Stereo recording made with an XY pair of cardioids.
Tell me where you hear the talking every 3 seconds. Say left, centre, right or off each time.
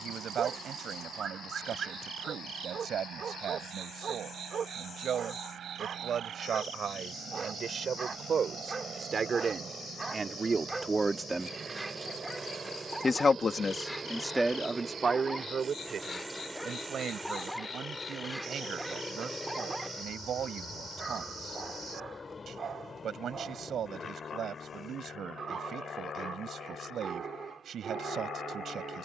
right, right, right, right, centre, right, right, right, right, right.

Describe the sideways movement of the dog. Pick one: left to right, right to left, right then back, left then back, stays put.
left then back.